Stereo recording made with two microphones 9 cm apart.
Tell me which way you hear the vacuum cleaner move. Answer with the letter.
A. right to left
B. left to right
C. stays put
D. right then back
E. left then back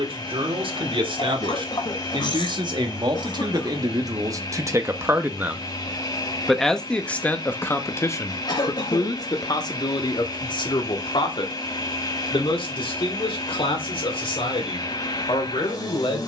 C.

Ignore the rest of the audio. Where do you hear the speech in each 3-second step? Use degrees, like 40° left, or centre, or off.
60° right, 40° right, 20° left, 50° left, 70° left, 70° left.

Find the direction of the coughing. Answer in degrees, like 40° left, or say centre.
50° left.